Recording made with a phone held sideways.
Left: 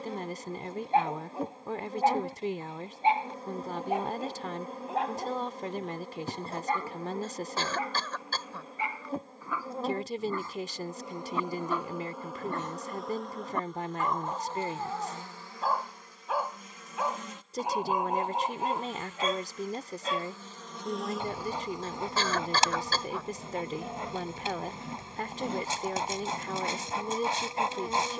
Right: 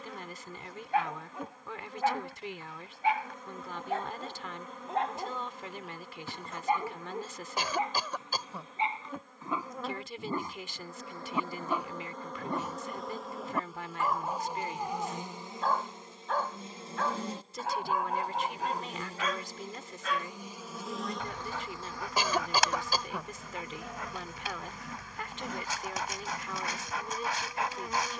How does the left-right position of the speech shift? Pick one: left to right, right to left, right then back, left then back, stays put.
stays put.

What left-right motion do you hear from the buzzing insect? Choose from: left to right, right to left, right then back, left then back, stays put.
right then back.